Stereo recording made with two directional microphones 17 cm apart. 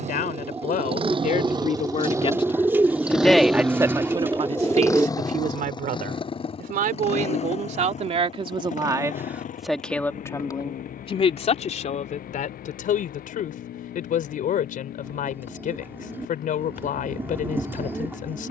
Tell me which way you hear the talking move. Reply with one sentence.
In this clip you hear the talking go right and come back.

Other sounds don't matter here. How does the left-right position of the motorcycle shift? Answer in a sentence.
You can hear the motorcycle travel towards the left.